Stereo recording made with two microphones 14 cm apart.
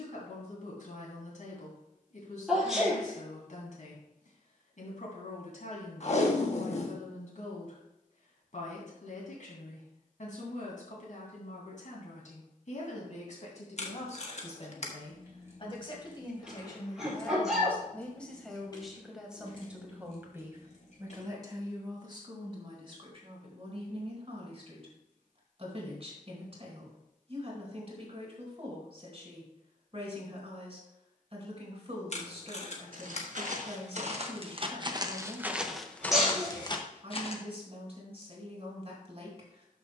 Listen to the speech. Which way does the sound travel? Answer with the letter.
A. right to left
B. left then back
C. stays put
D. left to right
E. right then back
D.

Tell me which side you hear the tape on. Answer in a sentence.
In this clip you hear the tape on the left.